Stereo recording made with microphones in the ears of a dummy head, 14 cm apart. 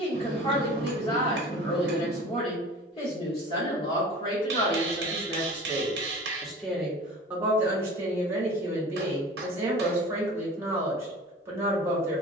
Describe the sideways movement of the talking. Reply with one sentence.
In this clip you hear the talking go from the left side to the right.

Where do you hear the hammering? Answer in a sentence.
You can hear the hammering on the right.